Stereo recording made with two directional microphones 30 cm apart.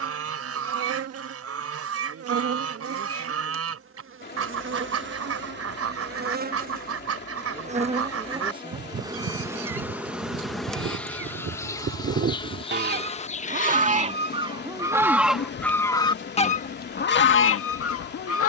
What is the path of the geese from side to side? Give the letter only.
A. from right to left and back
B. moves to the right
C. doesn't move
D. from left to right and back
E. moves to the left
E.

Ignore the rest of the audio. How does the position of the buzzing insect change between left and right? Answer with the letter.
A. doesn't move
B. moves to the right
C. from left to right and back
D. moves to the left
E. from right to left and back
D.